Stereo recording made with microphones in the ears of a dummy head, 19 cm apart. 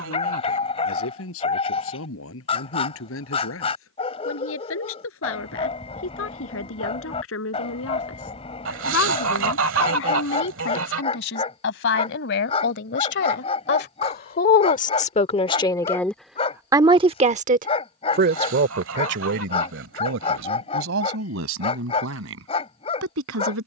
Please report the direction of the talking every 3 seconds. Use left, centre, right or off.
left, left, left, left, left, centre, right, right.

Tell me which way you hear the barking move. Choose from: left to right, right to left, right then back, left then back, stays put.
stays put.